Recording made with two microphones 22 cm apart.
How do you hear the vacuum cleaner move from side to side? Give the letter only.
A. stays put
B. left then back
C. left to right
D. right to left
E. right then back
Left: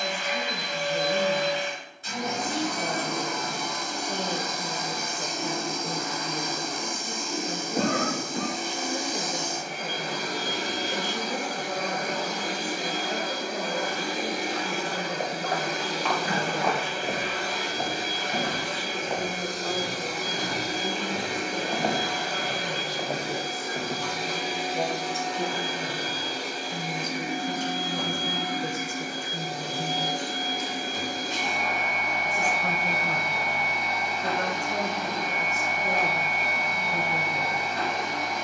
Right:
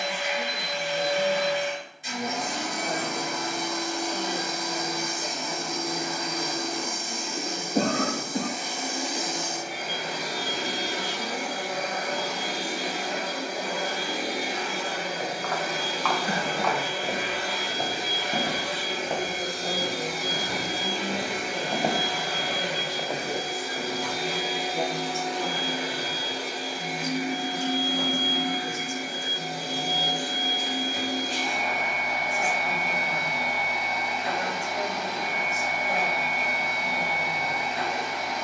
A.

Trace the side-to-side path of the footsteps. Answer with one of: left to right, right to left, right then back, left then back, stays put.
right then back.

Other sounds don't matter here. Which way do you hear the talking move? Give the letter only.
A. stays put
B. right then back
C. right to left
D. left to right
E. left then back
B.